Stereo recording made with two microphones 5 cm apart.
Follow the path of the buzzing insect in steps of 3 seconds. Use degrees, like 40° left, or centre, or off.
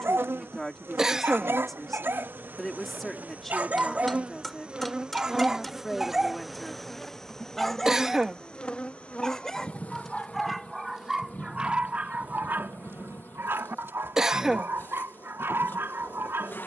50° right, 30° right, 10° left, 30° left, 50° left, 50° left.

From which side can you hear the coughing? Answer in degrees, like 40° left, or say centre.
10° right.